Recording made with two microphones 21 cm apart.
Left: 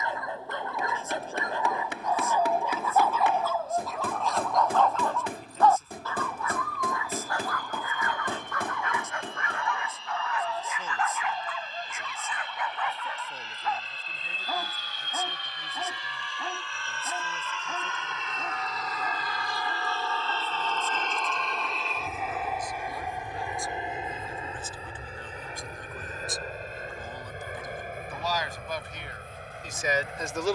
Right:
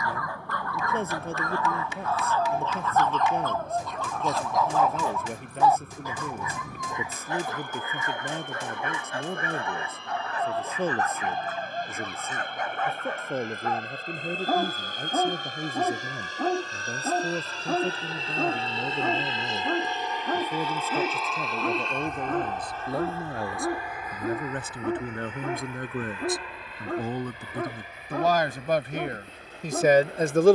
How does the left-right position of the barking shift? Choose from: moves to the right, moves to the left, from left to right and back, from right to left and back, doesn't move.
moves to the right.